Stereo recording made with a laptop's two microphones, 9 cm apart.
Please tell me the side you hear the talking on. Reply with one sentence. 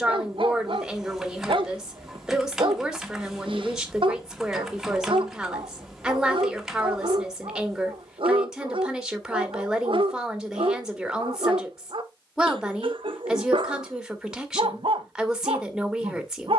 You can hear the talking in the centre.